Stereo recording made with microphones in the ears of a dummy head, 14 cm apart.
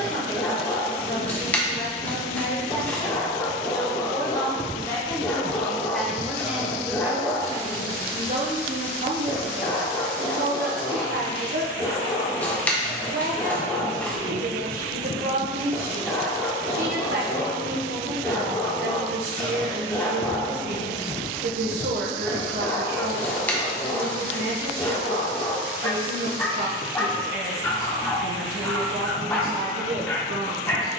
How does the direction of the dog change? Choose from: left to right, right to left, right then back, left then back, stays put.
stays put.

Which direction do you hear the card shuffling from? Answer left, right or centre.
centre.